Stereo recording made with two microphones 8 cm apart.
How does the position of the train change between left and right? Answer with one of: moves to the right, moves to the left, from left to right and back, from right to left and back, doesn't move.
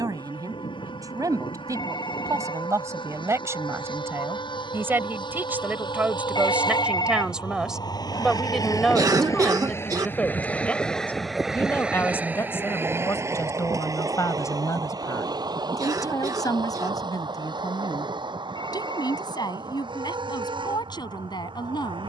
moves to the right.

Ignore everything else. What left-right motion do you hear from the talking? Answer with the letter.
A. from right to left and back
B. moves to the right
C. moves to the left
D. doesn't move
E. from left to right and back
C.